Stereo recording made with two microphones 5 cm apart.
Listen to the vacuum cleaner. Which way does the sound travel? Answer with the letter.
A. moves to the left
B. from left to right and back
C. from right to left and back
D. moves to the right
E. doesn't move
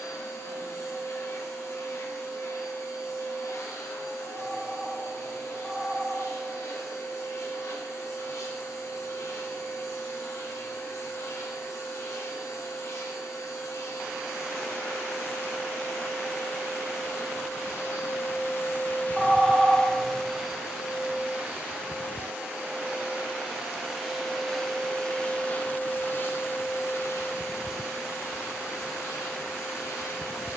B.